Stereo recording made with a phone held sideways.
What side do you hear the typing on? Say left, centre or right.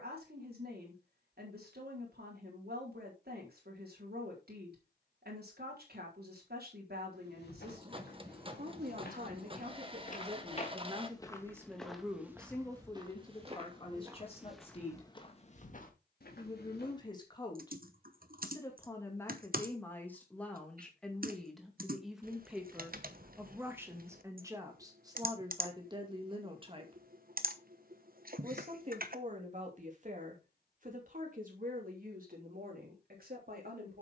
right.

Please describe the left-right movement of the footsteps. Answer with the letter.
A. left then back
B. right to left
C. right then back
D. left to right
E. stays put
C.